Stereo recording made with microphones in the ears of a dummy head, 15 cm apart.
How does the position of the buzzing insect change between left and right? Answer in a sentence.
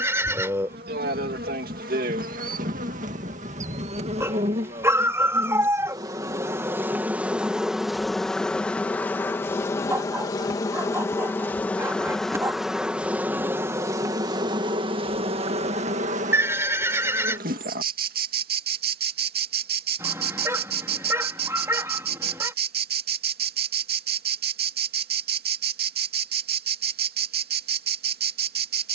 You can hear the buzzing insect move from right to left and back again.